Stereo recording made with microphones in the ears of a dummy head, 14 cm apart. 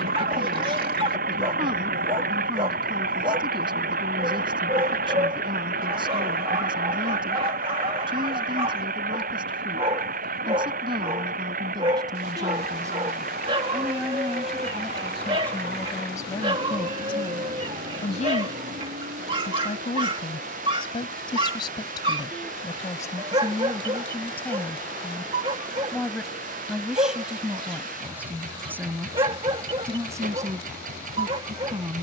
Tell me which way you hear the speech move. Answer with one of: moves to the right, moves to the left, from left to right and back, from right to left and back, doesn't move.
from right to left and back.